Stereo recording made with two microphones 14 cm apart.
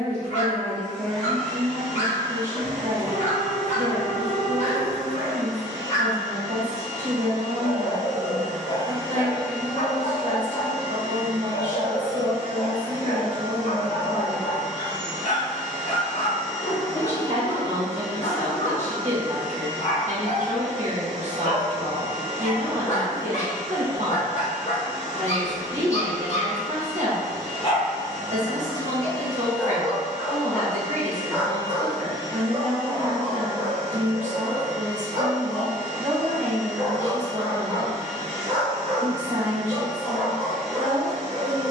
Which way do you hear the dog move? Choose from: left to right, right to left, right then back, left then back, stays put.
left to right.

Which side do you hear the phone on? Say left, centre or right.
right.